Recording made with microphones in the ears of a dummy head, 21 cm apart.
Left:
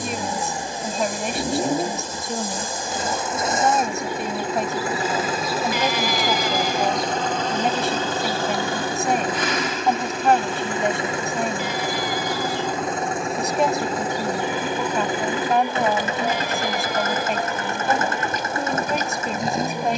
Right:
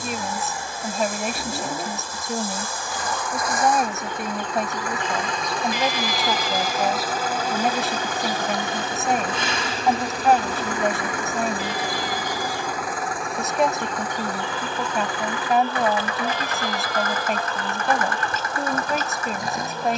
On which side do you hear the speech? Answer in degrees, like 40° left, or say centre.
centre.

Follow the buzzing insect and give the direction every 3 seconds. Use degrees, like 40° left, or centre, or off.
20° left, 10° left, 10° right, 30° right, centre, 10° left, 10° left.